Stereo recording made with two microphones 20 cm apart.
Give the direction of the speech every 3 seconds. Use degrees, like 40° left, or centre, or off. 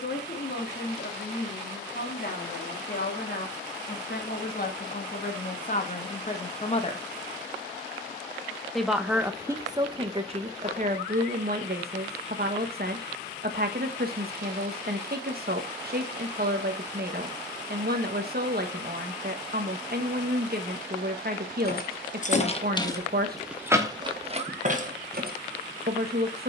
50° left, 50° left, 20° left, 30° right, 50° right, 50° right, 50° right, 50° right, 50° right.